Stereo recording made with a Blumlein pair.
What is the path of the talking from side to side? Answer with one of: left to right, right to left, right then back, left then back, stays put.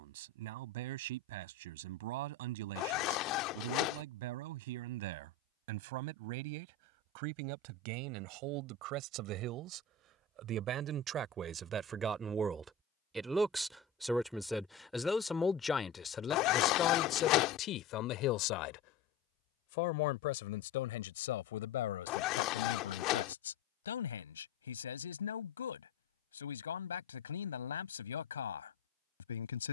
right to left.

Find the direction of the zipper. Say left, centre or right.
left.